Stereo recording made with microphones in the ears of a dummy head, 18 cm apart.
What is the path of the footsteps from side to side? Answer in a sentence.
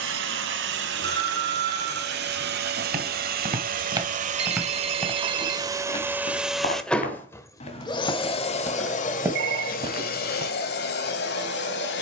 You can hear the footsteps move from right to left and back again.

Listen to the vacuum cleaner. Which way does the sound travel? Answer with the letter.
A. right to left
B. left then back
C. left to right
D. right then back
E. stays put
A.